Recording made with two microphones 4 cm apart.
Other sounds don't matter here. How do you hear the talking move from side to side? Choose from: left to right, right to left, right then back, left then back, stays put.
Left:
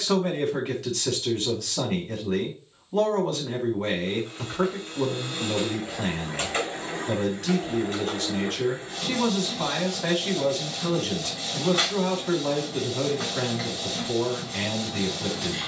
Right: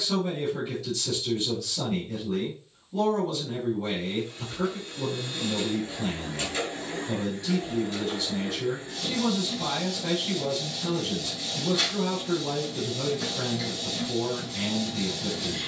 stays put.